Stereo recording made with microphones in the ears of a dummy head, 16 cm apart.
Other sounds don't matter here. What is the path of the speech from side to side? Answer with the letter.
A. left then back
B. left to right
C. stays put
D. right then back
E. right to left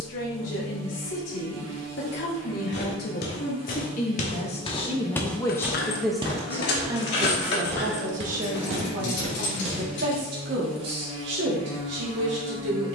B.